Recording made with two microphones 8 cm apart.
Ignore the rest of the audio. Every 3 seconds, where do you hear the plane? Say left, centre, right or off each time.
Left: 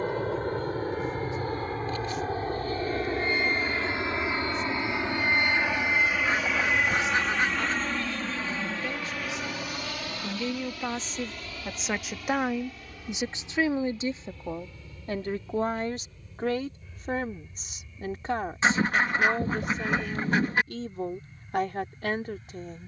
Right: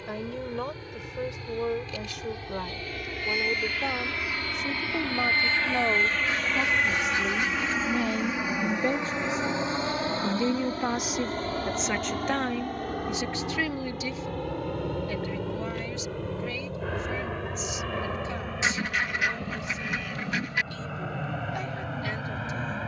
left, left, centre, right, right, right, right, right.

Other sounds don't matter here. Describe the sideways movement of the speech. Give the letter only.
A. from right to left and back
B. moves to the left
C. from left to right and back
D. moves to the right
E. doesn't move
B.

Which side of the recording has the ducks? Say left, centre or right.
left.